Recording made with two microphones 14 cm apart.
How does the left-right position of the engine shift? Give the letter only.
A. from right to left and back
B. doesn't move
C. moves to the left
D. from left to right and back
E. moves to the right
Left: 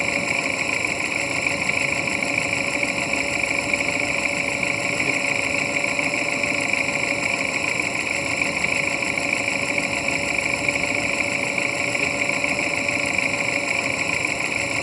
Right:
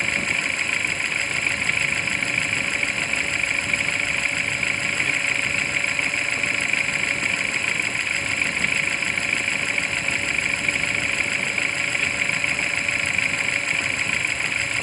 B.